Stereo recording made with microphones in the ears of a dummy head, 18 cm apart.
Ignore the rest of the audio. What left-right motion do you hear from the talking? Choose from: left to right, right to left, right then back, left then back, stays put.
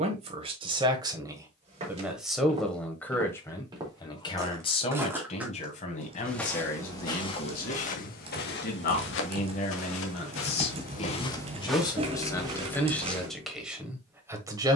left then back.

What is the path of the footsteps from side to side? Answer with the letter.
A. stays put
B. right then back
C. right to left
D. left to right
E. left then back
E.